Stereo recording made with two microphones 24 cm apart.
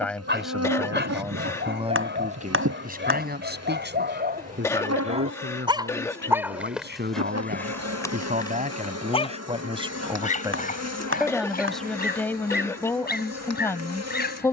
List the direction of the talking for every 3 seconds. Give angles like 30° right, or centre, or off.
20° right, 50° right, 40° right, 10° right, 10° left.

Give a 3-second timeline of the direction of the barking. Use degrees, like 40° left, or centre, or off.
50° right, 40° right, 10° left, 30° left, 40° left.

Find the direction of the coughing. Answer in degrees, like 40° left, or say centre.
10° left.